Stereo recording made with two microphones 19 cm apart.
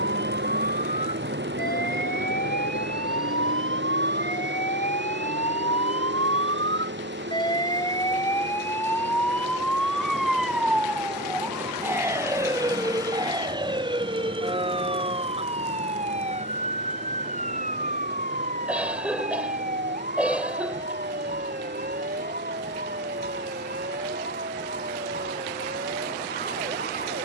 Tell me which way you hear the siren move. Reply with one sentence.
You can hear the siren travel towards the right.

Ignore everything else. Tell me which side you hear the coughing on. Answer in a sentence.
You can hear the coughing in the centre.